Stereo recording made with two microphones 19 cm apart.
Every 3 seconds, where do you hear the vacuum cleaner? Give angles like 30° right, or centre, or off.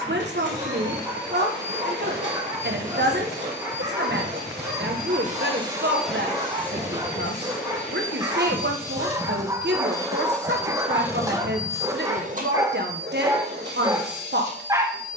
70° right, 60° right, 40° left, centre, 60° right.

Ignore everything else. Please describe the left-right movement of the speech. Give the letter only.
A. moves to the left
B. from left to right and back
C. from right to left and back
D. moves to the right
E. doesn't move
E.